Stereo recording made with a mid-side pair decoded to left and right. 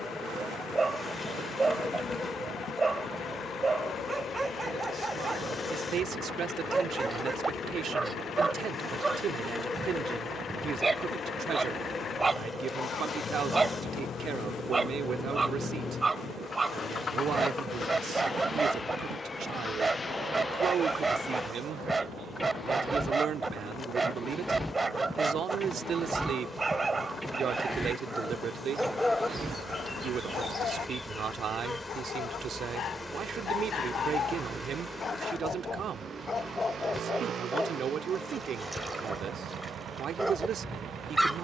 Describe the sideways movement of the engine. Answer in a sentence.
In this clip you hear the engine move to the right.